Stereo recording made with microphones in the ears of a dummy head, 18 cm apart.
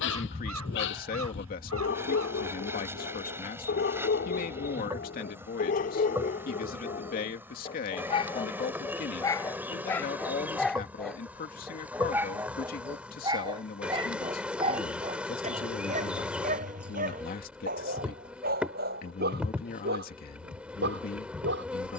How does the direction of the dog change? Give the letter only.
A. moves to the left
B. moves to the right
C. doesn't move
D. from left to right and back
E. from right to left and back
B.